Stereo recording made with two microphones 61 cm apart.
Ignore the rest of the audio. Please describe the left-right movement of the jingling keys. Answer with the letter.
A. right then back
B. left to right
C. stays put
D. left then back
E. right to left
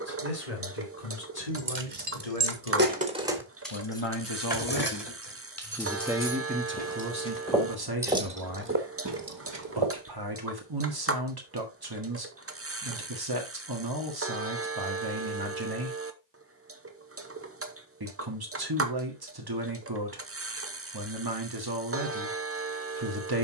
D.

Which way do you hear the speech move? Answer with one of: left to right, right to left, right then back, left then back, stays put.
left to right.